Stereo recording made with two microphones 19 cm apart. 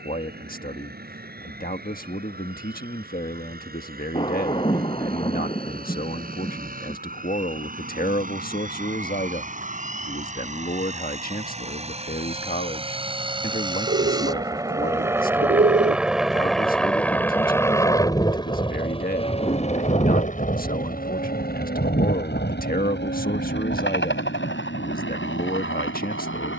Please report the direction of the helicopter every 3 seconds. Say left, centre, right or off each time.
right, right, right, right, right, centre, left, left, left.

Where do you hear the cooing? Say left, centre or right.
right.